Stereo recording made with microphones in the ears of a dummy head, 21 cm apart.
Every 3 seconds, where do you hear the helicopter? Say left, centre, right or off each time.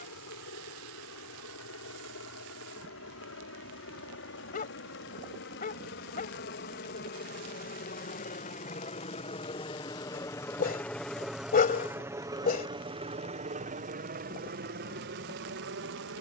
left, left, left, centre, right, right.